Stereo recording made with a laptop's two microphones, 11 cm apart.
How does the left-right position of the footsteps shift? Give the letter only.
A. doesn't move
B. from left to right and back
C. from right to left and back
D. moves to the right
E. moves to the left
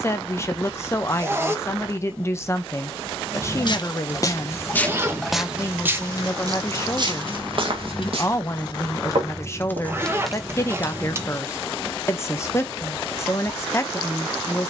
D.